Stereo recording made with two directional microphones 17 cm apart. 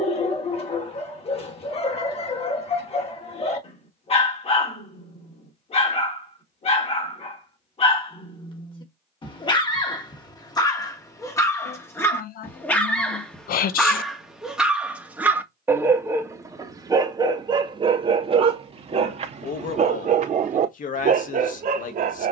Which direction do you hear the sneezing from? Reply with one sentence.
You can hear the sneezing on the left.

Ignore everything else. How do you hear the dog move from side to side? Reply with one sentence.
In this clip you hear the dog travel towards the right.